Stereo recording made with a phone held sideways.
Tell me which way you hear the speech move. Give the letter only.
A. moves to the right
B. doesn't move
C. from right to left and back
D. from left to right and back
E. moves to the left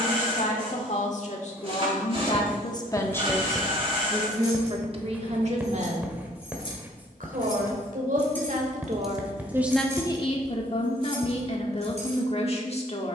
D.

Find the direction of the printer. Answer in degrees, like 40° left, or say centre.
40° right.